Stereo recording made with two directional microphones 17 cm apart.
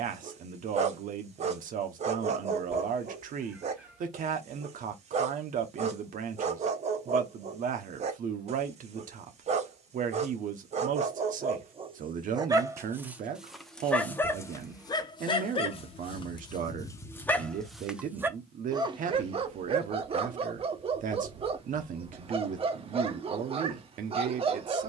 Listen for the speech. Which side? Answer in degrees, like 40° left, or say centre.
50° right.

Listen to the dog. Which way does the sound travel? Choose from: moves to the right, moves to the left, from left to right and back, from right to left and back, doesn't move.
from right to left and back.